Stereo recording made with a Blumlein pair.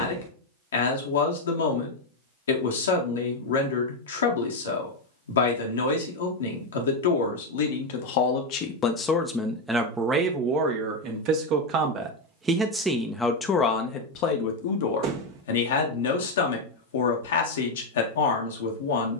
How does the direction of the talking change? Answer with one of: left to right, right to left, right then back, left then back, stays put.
right then back.